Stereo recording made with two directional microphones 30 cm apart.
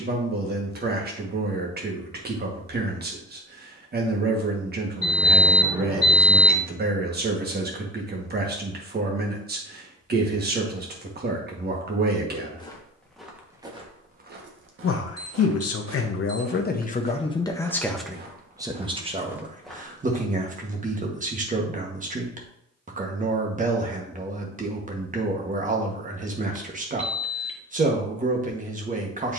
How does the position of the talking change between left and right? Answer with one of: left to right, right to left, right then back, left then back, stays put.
left then back.